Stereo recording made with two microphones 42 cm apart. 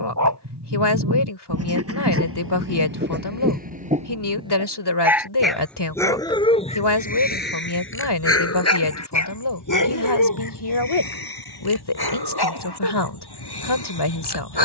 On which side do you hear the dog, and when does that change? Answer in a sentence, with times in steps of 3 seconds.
In this clip you hear the dog on the right from 0 s, in the centre from 3 s and on the left from 6 s.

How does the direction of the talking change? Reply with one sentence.
You can hear the talking stay in one place.